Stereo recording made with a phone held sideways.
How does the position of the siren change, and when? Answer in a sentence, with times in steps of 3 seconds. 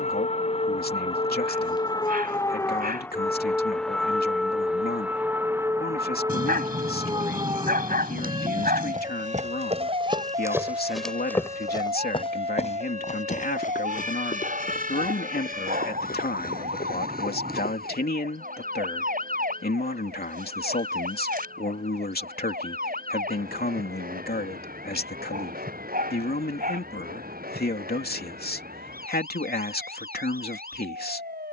You can hear the siren on the left from 0 s, in the centre from 3 s and on the right from 6 s.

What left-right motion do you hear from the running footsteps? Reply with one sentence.
In this clip you hear the running footsteps go from the right side to the left.